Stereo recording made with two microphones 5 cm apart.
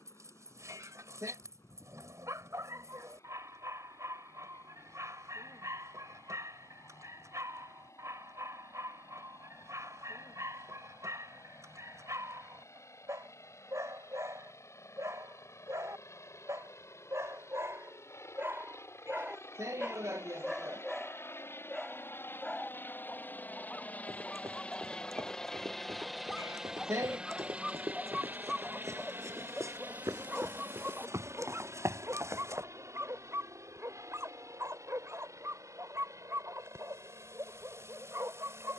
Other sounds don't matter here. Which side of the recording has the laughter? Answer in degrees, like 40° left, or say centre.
70° right.